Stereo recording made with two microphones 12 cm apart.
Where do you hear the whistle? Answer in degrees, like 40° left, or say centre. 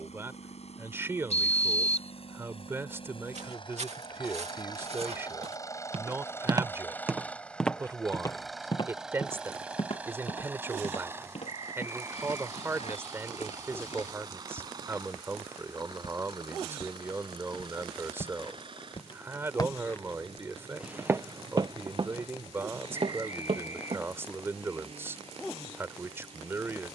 70° left.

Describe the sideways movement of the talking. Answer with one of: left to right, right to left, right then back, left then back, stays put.
stays put.